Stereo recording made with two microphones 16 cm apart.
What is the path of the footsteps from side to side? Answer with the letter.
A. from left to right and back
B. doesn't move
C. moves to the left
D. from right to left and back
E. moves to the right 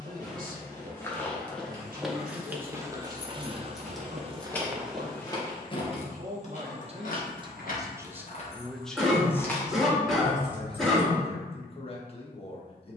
A.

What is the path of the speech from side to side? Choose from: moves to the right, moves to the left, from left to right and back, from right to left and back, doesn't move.
moves to the left.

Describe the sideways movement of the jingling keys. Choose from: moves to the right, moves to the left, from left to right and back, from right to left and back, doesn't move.
from right to left and back.